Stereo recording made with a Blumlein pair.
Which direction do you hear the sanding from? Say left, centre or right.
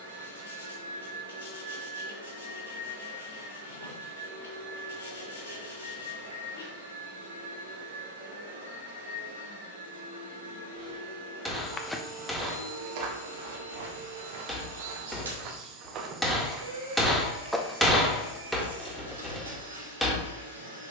left.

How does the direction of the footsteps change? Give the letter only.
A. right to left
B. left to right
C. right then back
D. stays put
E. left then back
C.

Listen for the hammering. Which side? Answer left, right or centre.
centre.